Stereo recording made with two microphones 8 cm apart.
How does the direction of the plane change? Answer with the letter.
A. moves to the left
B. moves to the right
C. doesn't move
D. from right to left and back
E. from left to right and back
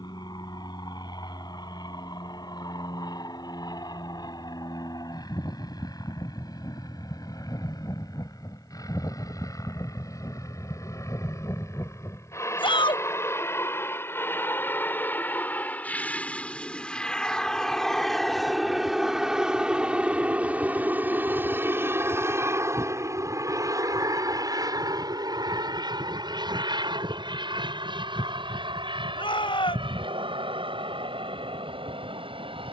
B.